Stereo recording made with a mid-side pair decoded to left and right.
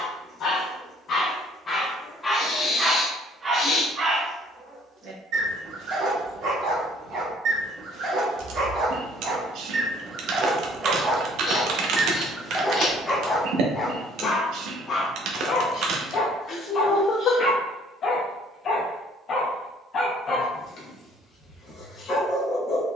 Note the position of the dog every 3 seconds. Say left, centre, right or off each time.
left, right, right, right, left, left, left, left.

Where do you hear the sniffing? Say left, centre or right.
left.